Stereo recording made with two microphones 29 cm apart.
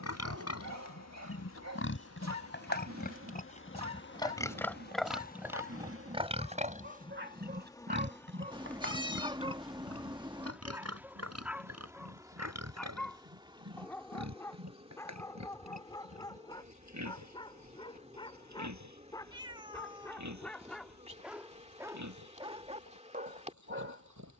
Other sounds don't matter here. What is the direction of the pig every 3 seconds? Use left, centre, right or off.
left, centre, right, right, right, right, right, right.